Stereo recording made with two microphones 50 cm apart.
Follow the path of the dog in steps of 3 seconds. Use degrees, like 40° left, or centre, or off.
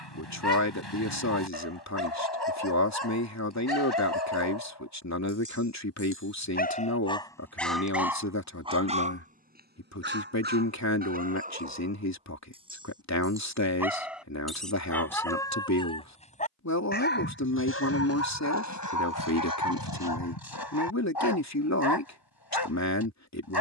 50° left, 50° left, 10° left, 20° right, centre, 20° left, 40° left, 50° left.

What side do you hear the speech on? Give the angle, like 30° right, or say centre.
30° left.